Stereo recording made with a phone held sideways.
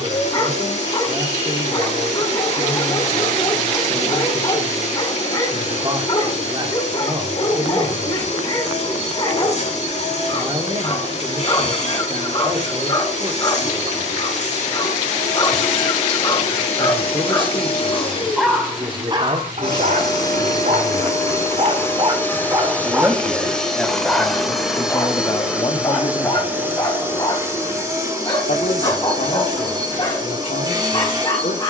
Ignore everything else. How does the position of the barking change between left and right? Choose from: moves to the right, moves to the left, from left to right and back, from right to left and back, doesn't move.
from left to right and back.